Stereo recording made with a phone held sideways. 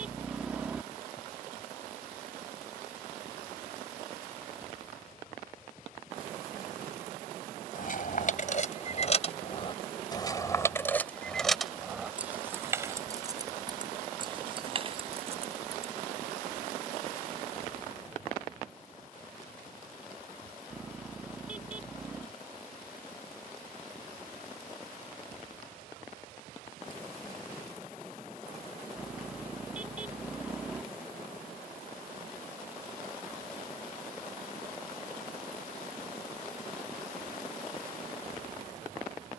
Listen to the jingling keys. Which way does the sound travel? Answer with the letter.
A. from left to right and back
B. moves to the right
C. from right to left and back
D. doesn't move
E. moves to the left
B.